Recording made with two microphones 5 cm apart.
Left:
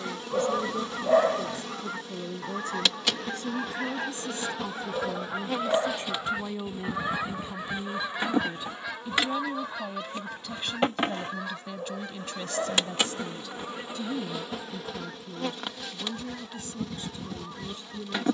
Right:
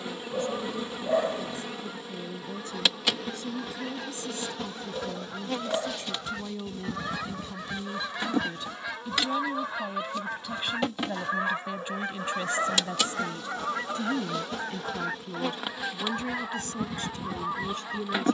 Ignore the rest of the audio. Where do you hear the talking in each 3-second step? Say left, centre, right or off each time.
left, left, left, centre, right, right.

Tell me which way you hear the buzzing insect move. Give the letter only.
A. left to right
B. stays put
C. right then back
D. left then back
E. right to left
D.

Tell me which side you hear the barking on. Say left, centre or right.
left.